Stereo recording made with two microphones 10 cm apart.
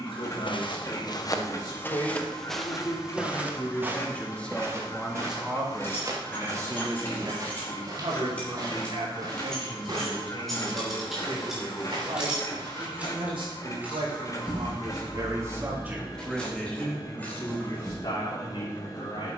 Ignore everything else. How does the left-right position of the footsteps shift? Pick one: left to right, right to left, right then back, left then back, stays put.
left to right.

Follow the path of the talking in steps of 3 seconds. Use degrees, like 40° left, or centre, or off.
50° left, 10° left, 50° right, 70° right, 60° right, centre, 50° left.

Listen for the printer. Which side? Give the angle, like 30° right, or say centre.
40° left.